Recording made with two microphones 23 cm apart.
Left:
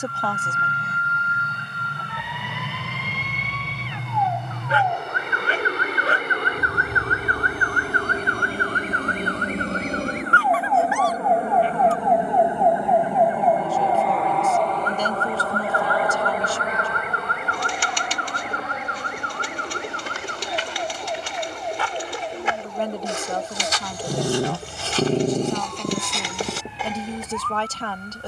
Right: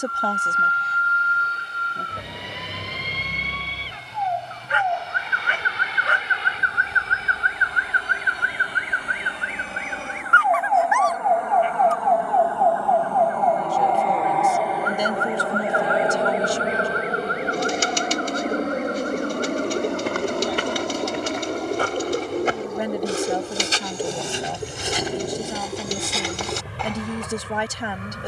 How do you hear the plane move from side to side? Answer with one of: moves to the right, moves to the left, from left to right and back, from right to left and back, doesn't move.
moves to the right.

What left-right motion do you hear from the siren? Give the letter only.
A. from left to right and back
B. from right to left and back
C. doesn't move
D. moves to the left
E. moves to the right
D.